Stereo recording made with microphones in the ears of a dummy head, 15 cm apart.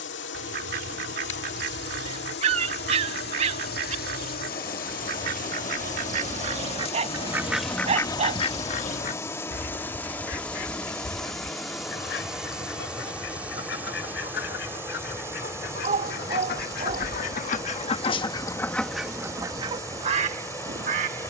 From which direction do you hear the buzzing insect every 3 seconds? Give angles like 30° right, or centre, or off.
70° left, 60° left, 30° left, 10° left, 10° right, 20° right, 20° right.